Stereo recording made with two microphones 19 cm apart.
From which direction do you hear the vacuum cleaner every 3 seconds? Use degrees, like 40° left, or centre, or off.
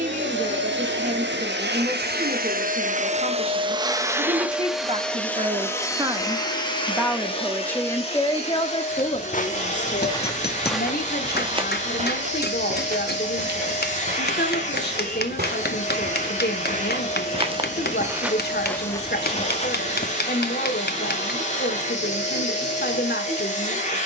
60° right, 10° right, 30° left, 40° left, 40° left, 40° left, 40° left, 40° left.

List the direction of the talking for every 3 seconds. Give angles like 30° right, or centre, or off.
40° right, 30° right, 10° left, 50° left, 60° left, 60° left, 60° left, 60° left.